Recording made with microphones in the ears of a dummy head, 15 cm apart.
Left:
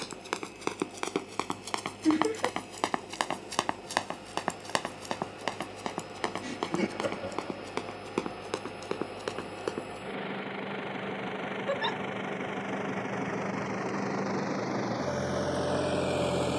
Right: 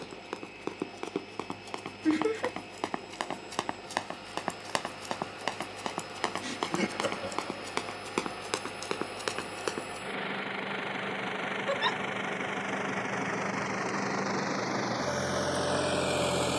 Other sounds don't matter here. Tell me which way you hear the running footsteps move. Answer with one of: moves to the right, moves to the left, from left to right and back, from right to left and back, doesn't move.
moves to the right.